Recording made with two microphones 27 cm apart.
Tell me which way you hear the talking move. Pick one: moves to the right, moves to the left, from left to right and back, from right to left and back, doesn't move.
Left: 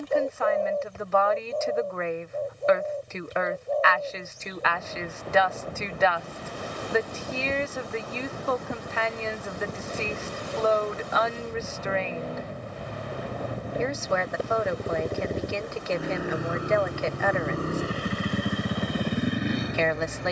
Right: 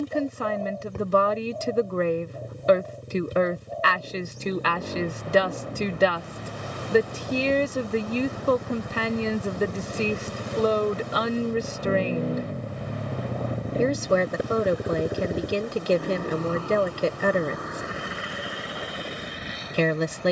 doesn't move.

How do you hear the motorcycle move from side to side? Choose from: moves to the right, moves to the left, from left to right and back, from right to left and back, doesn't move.
moves to the left.